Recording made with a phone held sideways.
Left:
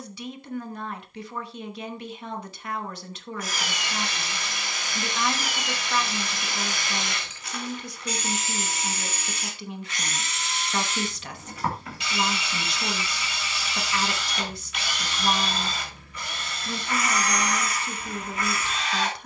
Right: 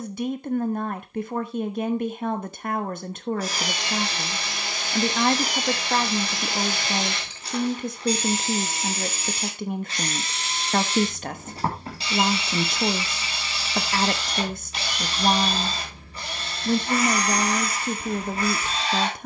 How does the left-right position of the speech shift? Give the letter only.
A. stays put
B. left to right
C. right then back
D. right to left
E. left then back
A.